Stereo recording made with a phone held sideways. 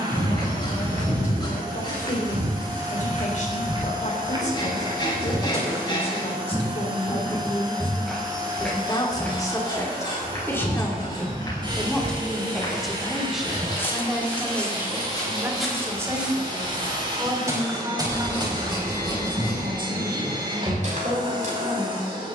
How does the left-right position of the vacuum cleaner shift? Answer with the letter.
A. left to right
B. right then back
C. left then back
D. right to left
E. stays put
E.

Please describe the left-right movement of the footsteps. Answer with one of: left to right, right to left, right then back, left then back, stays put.
left then back.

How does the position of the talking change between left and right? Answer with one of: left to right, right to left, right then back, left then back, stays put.
left to right.